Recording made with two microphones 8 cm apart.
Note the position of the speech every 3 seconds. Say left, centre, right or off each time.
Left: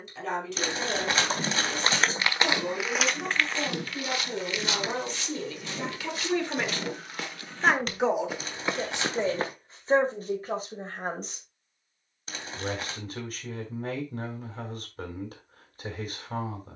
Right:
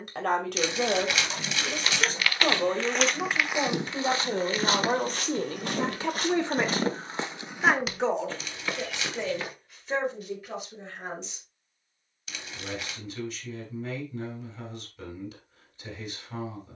right, right, centre, left, left, left.